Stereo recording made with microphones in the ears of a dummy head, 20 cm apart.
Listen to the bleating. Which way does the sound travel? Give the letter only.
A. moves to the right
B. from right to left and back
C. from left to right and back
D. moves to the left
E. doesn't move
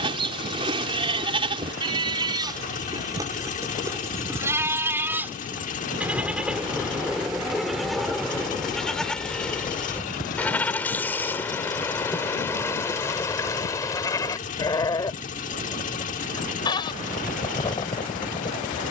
D.